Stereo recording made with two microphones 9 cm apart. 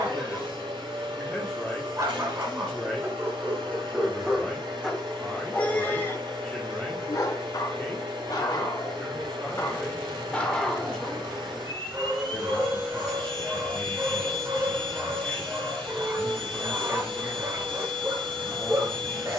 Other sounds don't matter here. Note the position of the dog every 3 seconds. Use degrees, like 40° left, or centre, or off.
40° right, 10° right, 40° left, 10° left, 30° right, 30° right, 30° right.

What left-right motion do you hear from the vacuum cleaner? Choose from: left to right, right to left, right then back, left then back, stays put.
stays put.